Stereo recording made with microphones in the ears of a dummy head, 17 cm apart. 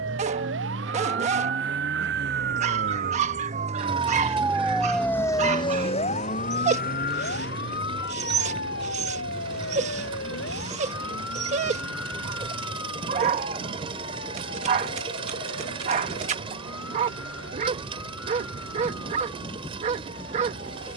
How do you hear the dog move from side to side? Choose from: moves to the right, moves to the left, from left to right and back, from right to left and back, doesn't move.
doesn't move.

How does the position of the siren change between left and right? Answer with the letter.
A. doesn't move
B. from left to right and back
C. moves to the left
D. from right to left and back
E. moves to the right
C.